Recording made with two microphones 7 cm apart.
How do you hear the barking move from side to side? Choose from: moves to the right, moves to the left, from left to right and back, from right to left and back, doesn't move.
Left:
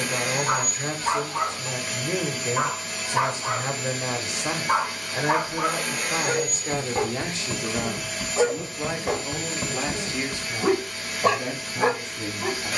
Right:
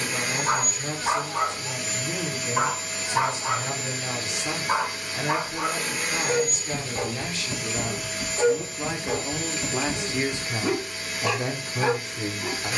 moves to the left.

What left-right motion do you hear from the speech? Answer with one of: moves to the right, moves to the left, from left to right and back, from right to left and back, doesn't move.
moves to the right.